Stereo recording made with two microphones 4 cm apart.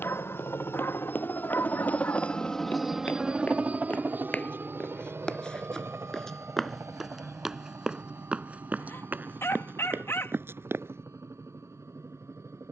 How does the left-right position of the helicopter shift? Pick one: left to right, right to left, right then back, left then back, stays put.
left to right.